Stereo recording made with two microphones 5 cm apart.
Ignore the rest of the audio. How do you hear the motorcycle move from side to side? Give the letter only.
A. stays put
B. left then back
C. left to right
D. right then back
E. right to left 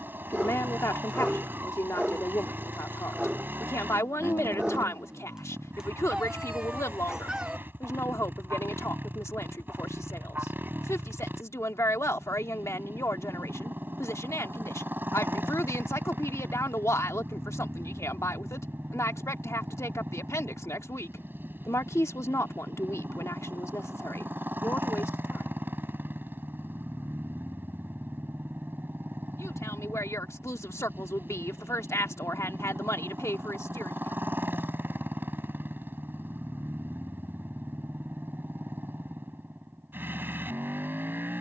A.